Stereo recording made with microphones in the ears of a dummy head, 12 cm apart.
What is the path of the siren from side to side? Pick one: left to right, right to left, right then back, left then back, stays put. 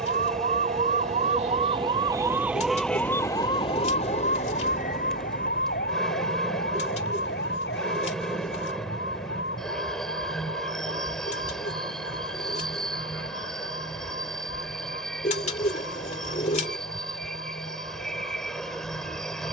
right to left.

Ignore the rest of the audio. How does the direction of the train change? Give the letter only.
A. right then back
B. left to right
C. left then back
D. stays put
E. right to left
D.